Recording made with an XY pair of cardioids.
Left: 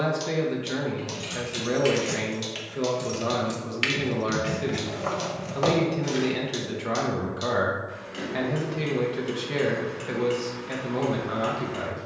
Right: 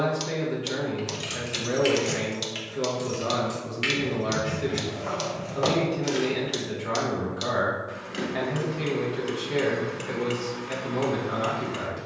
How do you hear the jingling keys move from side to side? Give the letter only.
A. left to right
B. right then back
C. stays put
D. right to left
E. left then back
E.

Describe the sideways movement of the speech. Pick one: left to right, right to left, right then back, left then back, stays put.
stays put.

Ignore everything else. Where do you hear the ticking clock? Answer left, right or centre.
right.